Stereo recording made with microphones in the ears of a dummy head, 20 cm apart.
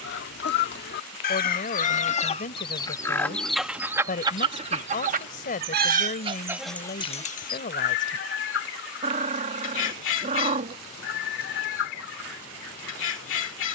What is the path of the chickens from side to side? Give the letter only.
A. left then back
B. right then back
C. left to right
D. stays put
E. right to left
B.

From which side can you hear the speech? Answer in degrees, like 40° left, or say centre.
40° left.